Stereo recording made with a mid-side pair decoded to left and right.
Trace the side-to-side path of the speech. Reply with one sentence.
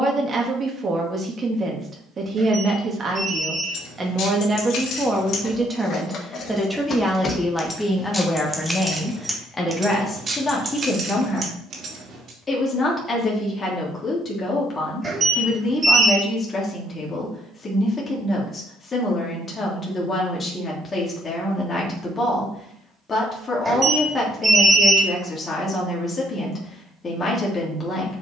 In this clip you hear the speech move from right to left.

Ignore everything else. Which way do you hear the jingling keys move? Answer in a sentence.
You can hear the jingling keys travel towards the right.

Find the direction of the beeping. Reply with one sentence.
You can hear the beeping on the right.